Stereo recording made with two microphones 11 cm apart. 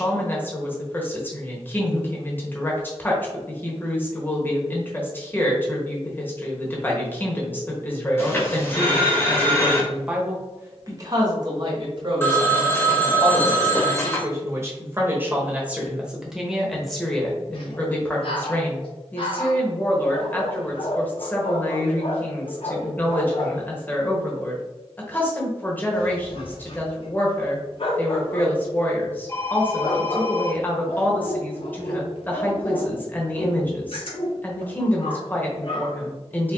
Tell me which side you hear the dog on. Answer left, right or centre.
left.